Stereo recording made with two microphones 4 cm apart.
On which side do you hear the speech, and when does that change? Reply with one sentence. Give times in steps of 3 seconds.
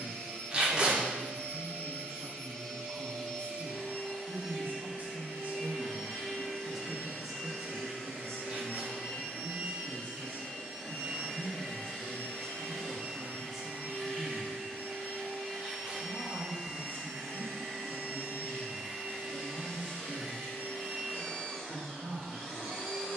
In this clip you hear the speech on the right from 0 s, in the centre from 6 s, on the left from 9 s, in the centre from 12 s and on the right from 15 s.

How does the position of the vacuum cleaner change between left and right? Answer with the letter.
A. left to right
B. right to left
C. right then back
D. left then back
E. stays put
E.